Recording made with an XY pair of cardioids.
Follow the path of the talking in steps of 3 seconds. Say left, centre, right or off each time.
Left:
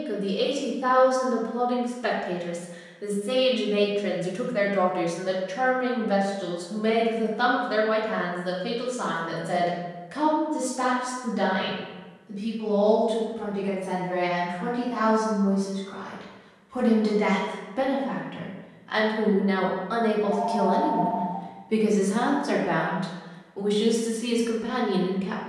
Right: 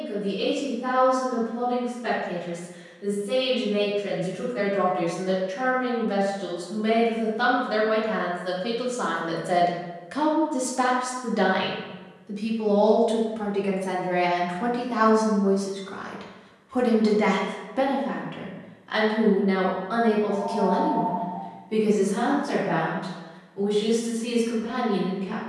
left, left, centre, right, right, right, centre, left, left.